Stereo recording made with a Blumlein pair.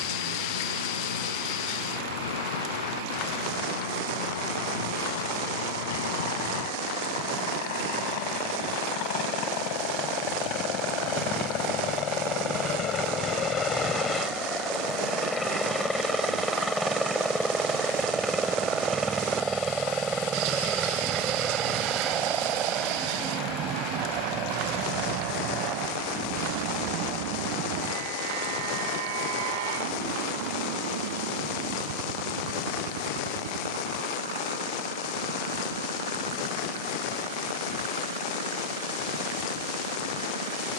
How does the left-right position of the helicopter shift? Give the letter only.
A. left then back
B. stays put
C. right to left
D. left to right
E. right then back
D.